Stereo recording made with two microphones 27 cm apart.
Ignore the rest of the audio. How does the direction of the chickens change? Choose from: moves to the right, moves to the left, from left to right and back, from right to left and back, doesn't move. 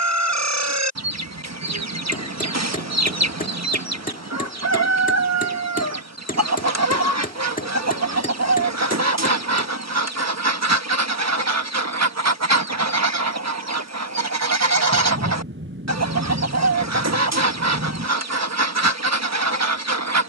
doesn't move.